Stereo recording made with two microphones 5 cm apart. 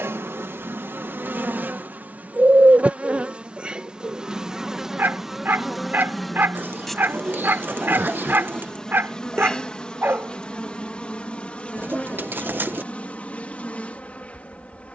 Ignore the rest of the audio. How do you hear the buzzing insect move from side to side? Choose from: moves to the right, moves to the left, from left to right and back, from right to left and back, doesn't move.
moves to the left.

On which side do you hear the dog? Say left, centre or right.
right.